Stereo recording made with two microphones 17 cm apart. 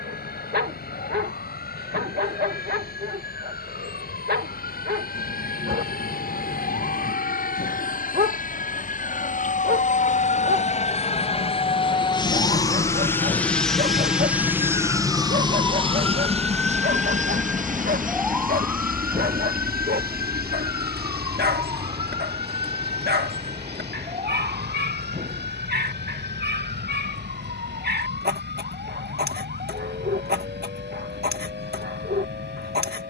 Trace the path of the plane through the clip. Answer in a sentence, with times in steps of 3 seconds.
In this clip you hear the plane on the left from 0 s, in the centre from 12 s and on the right from 15 s.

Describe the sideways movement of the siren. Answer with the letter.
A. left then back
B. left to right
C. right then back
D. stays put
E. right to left
B.